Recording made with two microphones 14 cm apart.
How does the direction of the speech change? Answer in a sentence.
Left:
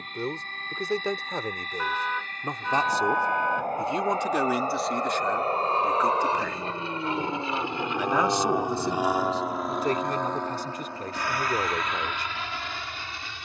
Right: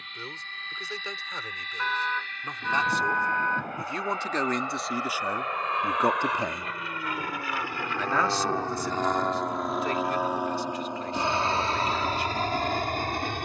You can hear the speech move from left to right and back again.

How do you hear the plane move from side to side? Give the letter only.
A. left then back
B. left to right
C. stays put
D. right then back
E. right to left
B.